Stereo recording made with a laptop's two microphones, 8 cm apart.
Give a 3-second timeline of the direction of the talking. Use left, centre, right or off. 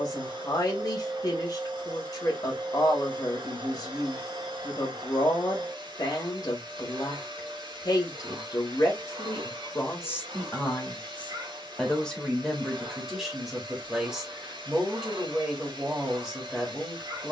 left, left, left, left, centre, centre.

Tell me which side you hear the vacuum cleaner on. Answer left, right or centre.
right.